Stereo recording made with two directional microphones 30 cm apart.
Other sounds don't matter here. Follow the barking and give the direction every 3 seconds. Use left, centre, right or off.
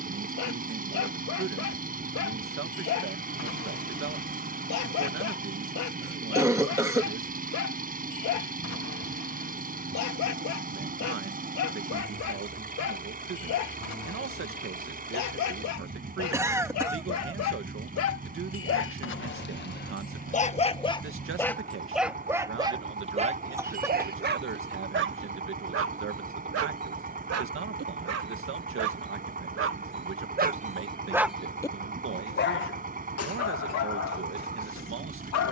left, left, left, left, left, left, left, centre, right, right, centre, left.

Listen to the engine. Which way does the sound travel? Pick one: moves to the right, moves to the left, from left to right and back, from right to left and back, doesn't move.
doesn't move.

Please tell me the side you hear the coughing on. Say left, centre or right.
centre.